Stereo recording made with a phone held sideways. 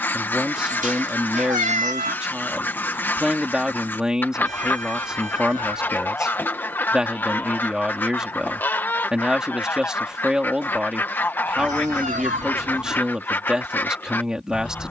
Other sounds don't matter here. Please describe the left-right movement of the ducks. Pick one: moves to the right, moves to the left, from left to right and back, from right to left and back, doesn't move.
doesn't move.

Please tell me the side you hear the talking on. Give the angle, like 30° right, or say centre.
centre.